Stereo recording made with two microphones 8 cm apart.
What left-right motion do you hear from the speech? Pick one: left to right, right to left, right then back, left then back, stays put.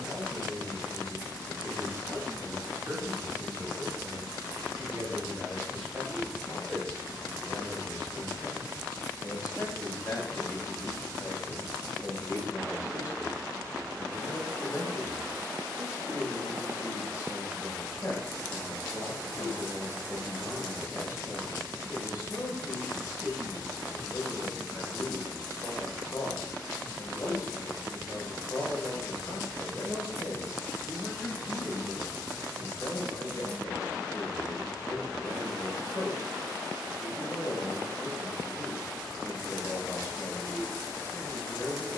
right to left.